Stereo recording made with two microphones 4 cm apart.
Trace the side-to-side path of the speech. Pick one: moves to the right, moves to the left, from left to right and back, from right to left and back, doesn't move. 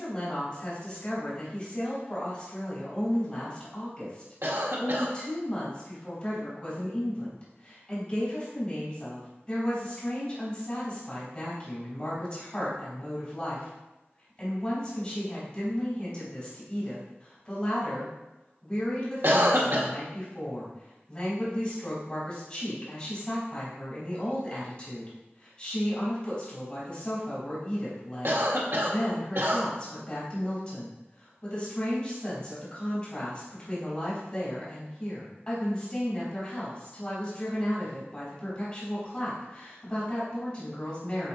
doesn't move.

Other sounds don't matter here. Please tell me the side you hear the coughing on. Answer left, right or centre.
right.